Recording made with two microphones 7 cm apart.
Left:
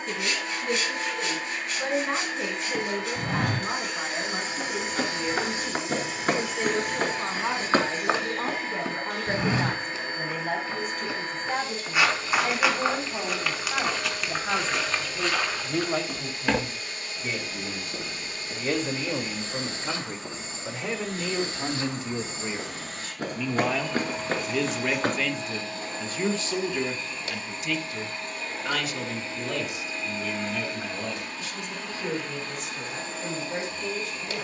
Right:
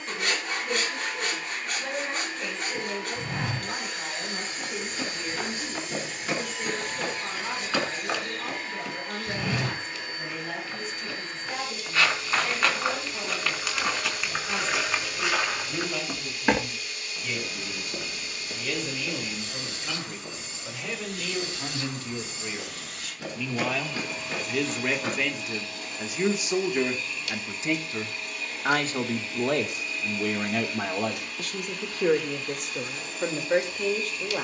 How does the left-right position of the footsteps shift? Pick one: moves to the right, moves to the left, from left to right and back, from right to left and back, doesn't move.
from left to right and back.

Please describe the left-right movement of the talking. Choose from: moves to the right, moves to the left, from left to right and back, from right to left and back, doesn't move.
moves to the right.